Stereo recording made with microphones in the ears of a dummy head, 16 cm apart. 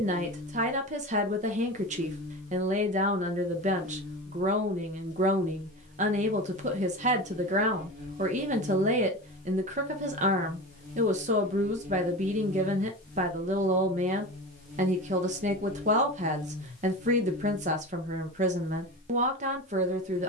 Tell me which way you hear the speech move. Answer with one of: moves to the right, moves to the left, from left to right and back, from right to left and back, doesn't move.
doesn't move.